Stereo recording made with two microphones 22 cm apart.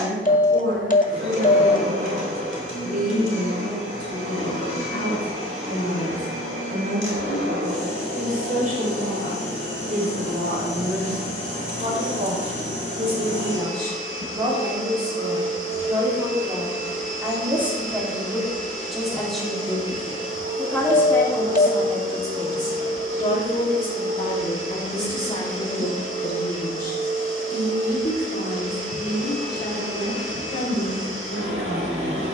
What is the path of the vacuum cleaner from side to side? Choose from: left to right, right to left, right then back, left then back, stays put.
stays put.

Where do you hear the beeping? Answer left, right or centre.
left.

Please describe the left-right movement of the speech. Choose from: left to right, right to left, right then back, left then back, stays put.
right to left.